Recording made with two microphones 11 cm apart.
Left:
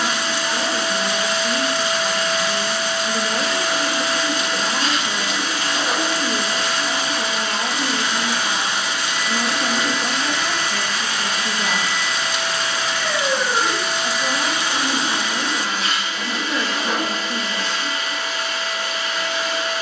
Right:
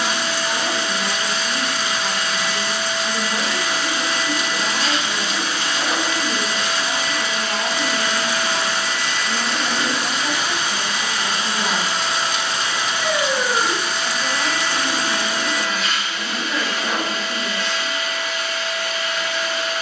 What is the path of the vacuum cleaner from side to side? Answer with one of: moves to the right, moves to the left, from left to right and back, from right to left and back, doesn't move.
from left to right and back.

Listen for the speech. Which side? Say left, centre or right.
centre.